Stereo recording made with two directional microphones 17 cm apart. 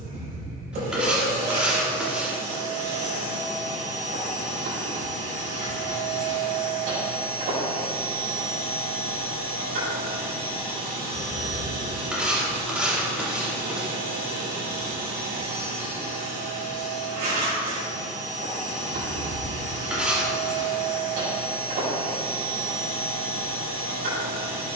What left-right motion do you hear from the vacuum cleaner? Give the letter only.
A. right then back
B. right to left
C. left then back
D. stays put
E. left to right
D.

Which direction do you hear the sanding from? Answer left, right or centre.
centre.